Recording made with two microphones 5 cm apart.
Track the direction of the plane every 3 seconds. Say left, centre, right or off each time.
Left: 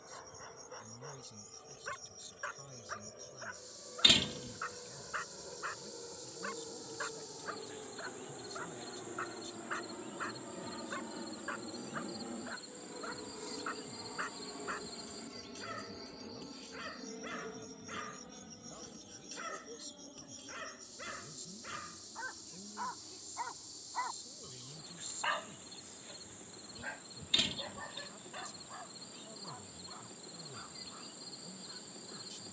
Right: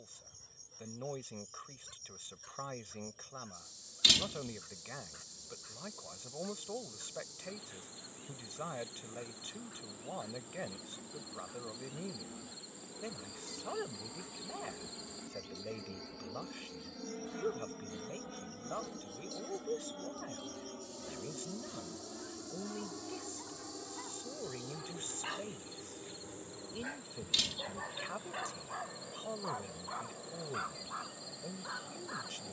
left, left, left, left, left, centre, right, right, right, right, right.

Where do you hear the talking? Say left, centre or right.
right.